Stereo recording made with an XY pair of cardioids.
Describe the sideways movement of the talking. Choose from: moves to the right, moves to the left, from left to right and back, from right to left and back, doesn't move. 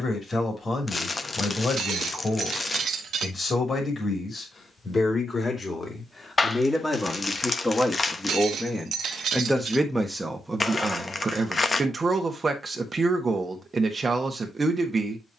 moves to the right.